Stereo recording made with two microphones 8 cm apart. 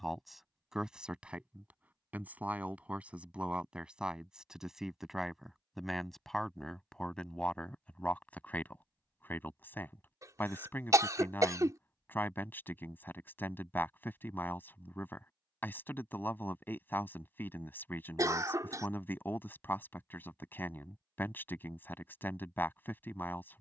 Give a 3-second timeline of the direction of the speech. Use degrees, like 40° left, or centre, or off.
10° right, 10° right, 10° left, 20° left, 20° left, 20° left, 20° left, 20° left.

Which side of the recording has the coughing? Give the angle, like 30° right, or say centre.
40° right.